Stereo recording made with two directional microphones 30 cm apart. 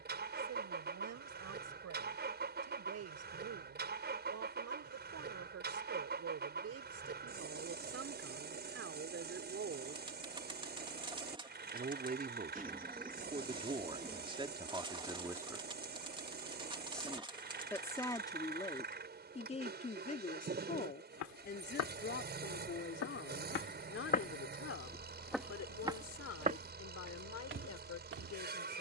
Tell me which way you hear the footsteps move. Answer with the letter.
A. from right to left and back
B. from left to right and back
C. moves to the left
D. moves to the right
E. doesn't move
D.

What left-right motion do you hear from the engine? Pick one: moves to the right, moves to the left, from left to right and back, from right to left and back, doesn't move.
doesn't move.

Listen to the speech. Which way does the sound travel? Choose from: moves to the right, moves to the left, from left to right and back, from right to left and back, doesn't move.
moves to the left.